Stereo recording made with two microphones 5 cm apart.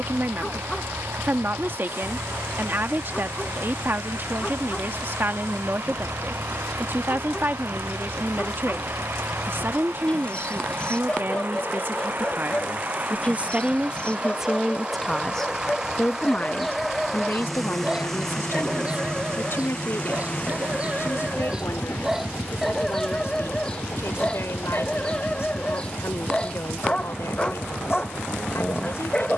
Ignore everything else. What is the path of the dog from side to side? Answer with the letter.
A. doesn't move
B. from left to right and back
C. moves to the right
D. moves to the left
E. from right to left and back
B.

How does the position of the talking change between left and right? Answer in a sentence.
You can hear the talking move from right to left.